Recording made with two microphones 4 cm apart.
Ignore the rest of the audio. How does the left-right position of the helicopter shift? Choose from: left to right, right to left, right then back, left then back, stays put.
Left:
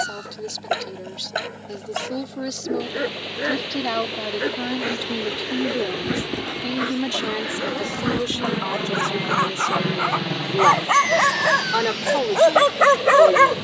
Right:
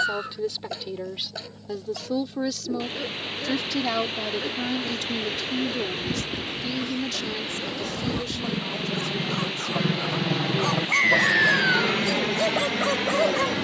left to right.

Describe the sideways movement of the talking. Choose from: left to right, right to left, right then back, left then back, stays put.
right to left.